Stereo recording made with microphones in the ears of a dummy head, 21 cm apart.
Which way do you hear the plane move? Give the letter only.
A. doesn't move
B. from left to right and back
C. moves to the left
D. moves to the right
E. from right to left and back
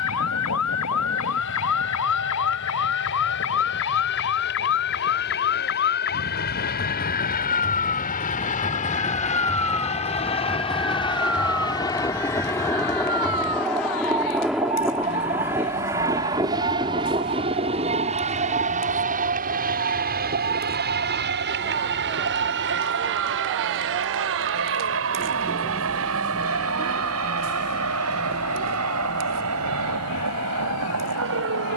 D.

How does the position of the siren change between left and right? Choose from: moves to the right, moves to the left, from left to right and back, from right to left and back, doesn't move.
moves to the right.